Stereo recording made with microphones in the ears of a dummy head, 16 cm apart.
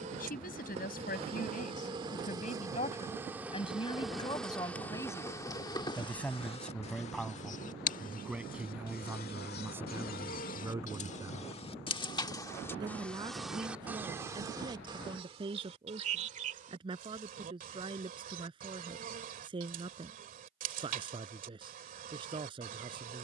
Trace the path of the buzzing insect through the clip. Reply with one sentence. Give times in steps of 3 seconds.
In this clip you hear the buzzing insect on the right from 0 s, in the centre from 3 s, on the left from 6 s, in the centre from 12 s and on the right from 15 s.